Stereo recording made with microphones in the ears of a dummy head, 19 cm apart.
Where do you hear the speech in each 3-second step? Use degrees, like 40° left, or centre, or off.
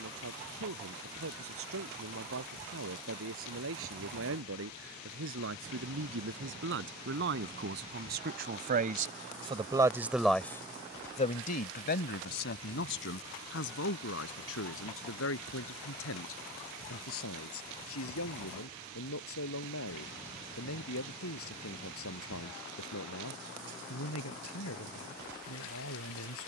80° right, 70° right, 60° right, 10° left, 70° left, 80° left, 80° left, 80° left, 80° left.